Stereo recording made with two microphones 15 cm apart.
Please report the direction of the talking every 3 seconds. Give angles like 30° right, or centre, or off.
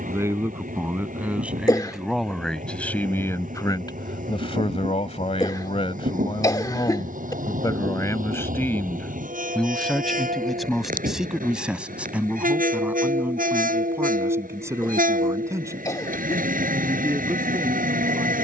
10° right, 40° left, 30° left, centre, 10° right, 20° right.